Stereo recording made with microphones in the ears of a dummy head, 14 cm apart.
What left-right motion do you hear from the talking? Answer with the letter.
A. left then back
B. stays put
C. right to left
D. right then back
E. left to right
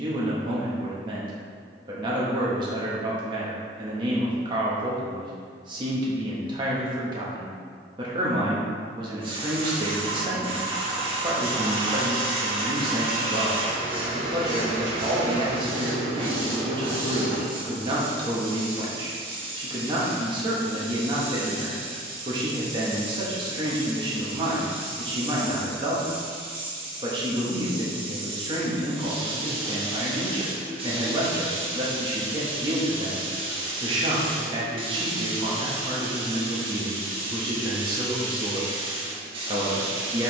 B.